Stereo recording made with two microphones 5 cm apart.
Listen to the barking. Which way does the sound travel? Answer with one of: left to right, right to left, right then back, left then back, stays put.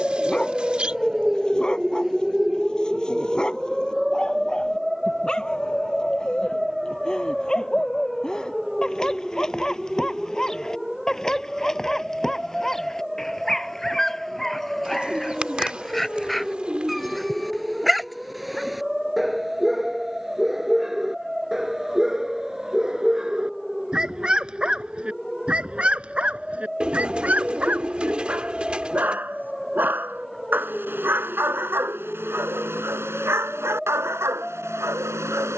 left to right.